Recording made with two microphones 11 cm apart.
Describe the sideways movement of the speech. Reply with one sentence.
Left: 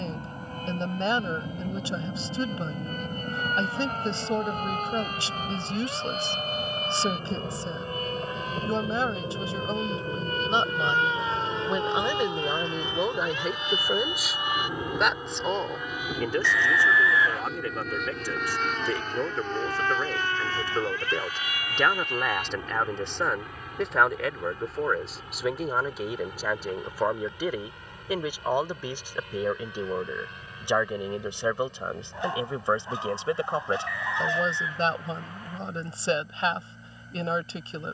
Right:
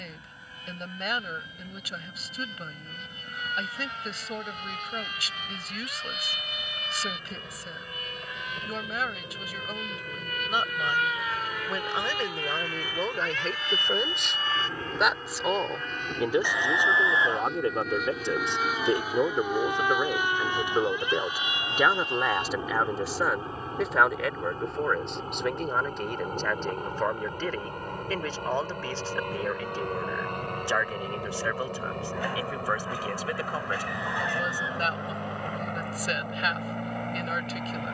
In this clip you hear the speech go right and come back.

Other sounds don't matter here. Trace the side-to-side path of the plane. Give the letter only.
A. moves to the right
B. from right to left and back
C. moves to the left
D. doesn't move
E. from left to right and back
A.